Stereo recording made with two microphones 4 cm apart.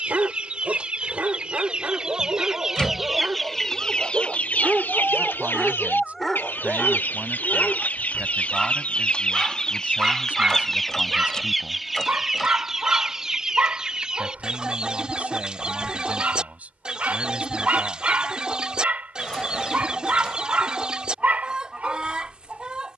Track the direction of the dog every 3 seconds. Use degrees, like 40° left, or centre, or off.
50° right, 30° right, 10° left, 30° right, 40° right, 40° right, 40° right, 40° right.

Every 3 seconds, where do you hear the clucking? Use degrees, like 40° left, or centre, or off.
20° right, 40° left, 50° left, 10° left, 10° right, 20° right, 20° right, 20° right.